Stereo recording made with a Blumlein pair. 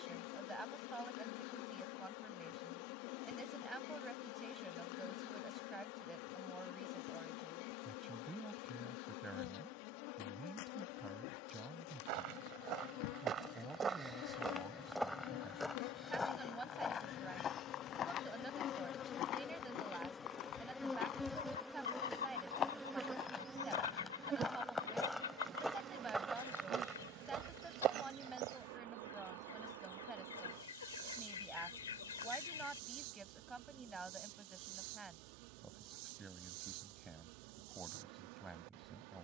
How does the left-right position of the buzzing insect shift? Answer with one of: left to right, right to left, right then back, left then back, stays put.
left to right.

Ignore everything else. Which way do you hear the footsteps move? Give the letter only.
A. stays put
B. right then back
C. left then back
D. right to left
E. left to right
C.